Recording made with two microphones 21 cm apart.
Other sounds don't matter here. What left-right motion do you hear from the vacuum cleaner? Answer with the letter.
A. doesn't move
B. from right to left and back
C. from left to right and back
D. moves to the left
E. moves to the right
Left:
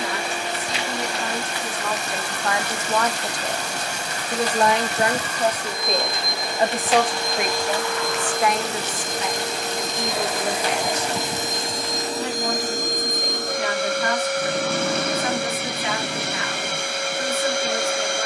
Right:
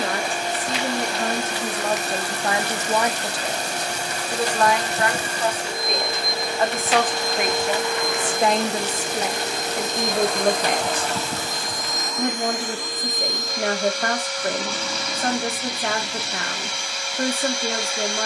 D.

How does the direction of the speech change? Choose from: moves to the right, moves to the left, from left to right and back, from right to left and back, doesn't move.
from right to left and back.